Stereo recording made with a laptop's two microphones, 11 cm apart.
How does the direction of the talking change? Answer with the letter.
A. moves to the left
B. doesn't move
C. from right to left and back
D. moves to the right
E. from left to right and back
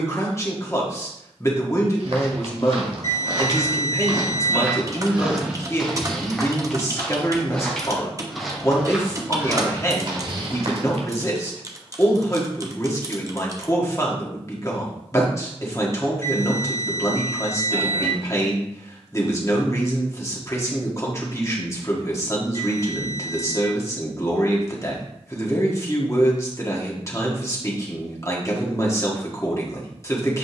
B.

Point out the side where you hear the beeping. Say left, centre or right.
right.